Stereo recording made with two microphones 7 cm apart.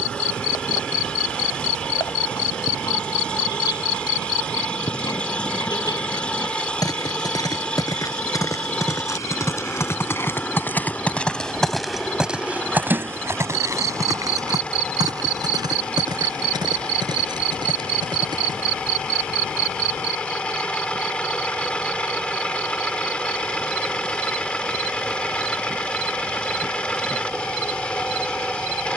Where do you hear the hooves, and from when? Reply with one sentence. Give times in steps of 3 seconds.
In this clip you hear the hooves on the left from 0 s, on the right from 12 s and not at all from 21 s.